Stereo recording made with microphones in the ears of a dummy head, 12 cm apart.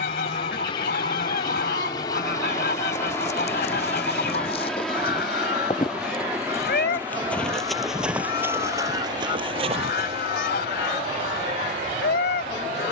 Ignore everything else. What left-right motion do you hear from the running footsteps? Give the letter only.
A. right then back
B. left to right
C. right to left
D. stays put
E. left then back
B.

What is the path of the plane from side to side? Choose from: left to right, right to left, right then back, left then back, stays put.
left to right.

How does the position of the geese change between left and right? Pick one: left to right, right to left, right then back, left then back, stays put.
stays put.